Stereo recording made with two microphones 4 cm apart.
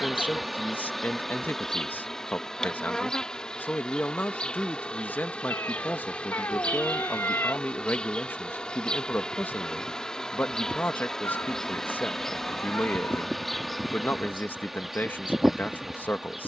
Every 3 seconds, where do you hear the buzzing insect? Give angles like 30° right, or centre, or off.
10° left, 20° left, 20° left, 10° left, centre, centre.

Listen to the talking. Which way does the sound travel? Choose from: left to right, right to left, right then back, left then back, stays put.
stays put.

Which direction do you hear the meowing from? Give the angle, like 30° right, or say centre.
70° left.